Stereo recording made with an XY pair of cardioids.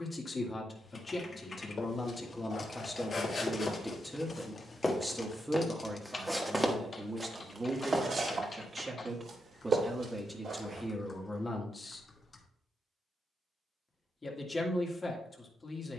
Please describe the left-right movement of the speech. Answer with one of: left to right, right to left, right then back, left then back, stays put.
right then back.